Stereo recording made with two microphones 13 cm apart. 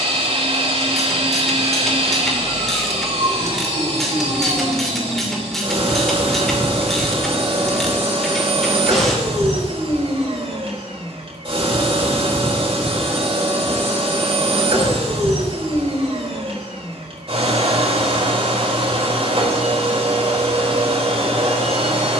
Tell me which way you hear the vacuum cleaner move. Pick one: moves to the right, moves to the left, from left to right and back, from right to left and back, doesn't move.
doesn't move.